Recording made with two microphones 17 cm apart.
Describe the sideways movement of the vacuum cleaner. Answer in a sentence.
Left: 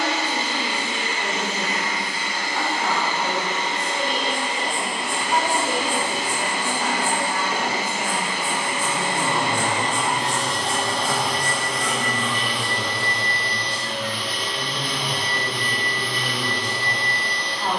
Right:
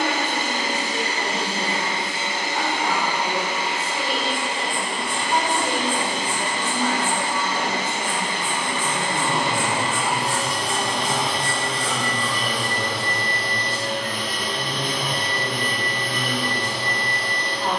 In this clip you hear the vacuum cleaner go left and come back.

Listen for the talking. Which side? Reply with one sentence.
In this clip you hear the talking in the centre.